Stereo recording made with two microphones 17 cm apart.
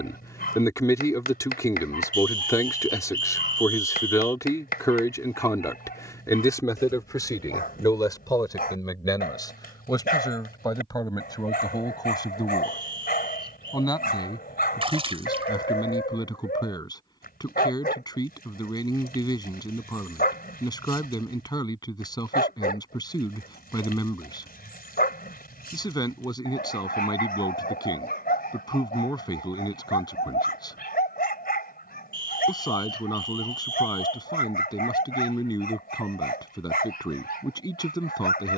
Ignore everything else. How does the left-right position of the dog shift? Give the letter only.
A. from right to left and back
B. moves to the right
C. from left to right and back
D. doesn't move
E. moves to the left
D.